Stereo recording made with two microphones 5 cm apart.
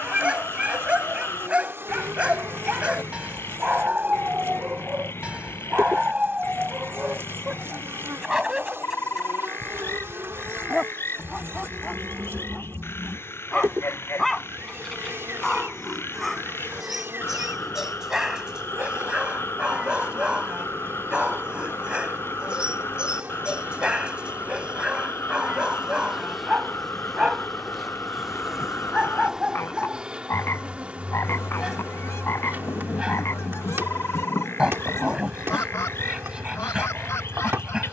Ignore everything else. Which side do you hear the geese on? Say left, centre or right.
left.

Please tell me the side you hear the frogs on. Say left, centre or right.
left.